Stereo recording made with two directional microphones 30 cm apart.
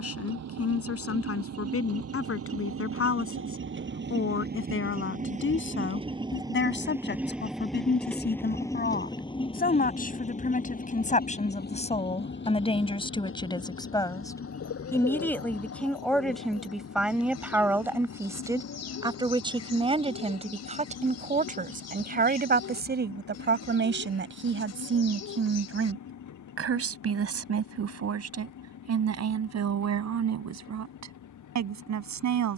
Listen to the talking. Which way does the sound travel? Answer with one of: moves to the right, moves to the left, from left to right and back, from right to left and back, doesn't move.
moves to the right.